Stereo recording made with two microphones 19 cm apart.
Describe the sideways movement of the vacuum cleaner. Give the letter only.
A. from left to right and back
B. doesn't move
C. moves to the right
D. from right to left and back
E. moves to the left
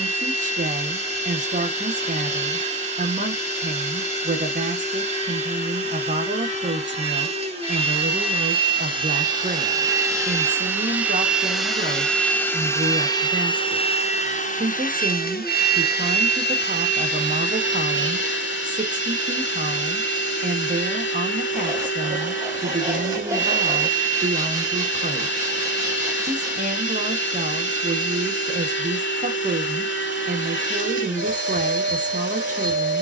E.